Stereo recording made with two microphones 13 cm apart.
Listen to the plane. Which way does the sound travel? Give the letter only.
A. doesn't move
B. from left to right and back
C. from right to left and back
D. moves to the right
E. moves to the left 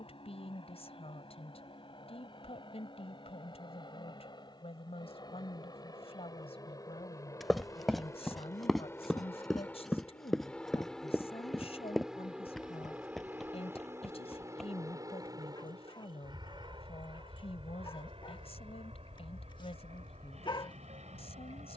D.